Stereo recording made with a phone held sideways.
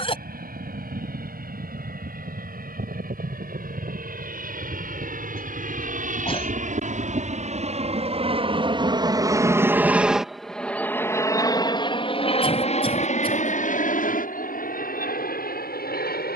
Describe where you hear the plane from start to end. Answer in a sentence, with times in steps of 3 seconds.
In this clip you hear the plane on the right from 0 s, in the centre from 9 s and on the left from 12 s.